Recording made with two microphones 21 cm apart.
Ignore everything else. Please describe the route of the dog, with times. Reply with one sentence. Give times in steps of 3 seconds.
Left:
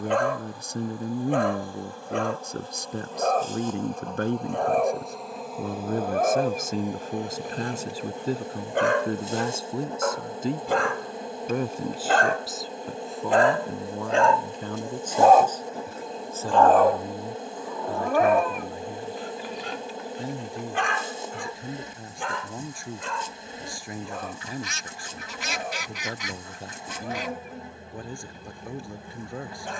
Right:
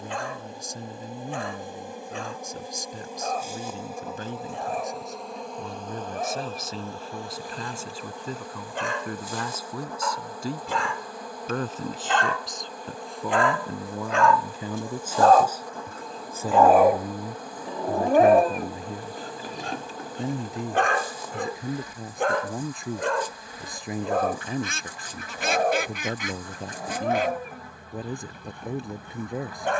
You can hear the dog on the left from 0 s, in the centre from 15 s and on the right from 18 s.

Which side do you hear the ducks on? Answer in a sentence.
In this clip you hear the ducks on the right.